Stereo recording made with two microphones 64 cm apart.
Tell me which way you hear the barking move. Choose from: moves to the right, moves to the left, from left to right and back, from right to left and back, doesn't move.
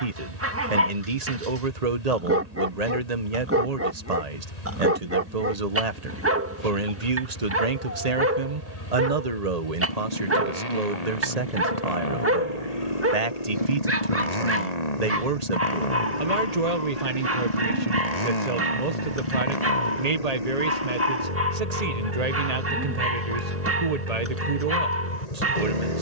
doesn't move.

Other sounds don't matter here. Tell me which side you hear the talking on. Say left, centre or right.
right.